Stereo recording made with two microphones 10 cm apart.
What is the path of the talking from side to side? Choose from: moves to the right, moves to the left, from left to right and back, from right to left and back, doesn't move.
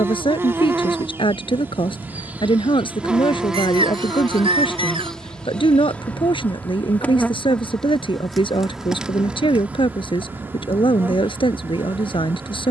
doesn't move.